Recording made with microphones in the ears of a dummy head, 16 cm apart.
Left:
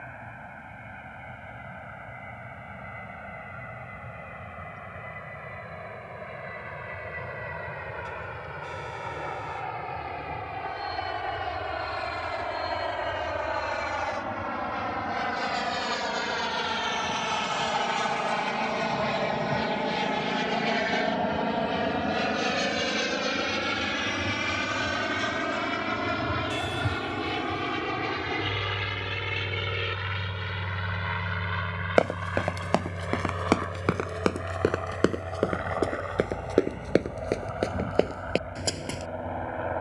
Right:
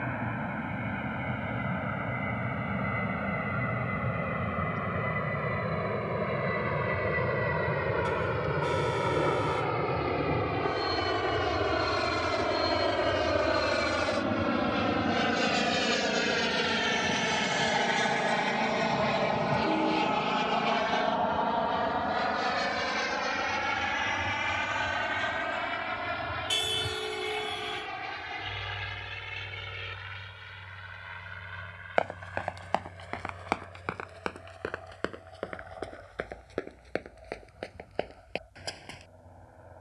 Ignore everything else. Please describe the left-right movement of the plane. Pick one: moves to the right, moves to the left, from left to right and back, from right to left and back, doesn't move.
moves to the left.